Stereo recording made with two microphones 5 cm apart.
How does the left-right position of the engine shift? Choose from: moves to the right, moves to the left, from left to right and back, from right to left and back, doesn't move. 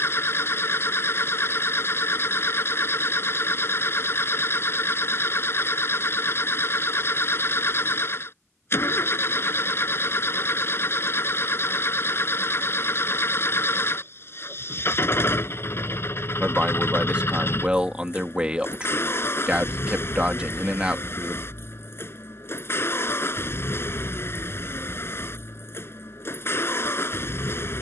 doesn't move.